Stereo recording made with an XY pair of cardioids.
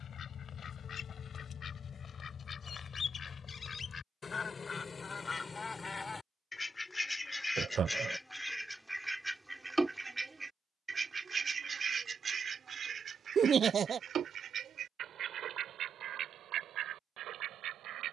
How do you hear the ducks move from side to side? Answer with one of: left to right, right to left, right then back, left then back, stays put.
left to right.